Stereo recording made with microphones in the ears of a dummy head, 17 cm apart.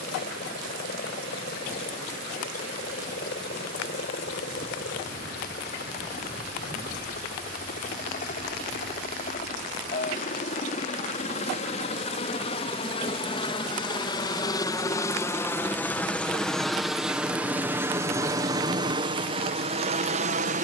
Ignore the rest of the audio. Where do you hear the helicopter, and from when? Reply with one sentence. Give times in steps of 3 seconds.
You can hear the helicopter on the left from 0 s, in the centre from 15 s and on the right from 18 s.